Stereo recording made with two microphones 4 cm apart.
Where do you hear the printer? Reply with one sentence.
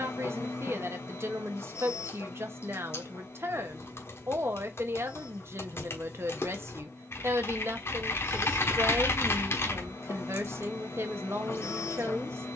In this clip you hear the printer on the left.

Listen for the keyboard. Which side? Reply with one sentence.
You can hear the keyboard on the left.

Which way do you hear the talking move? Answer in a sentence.
You can hear the talking stay in one place.